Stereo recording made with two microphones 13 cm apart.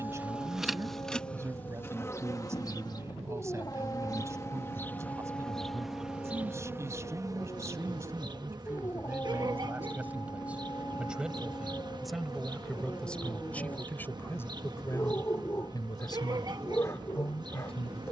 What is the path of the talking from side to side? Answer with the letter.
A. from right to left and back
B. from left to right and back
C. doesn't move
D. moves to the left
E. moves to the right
D.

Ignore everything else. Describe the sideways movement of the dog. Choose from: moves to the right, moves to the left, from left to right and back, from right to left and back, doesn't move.
doesn't move.